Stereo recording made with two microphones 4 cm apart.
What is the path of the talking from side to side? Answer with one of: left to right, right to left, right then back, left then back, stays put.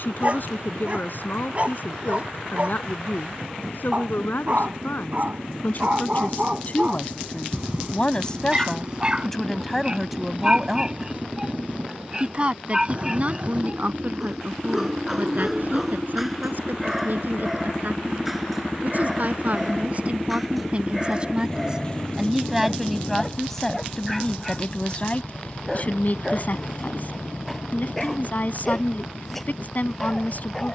right then back.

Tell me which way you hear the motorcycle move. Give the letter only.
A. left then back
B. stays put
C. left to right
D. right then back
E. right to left
E.